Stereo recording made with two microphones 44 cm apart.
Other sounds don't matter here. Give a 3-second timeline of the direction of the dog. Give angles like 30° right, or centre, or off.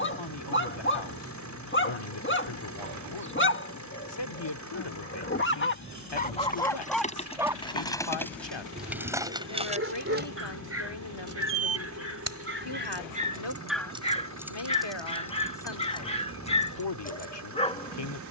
30° left, 30° left, centre, 30° right, 10° right, 10° left.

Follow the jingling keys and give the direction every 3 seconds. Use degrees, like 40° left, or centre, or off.
off, off, 10° left, 20° right, 10° right, 10° left.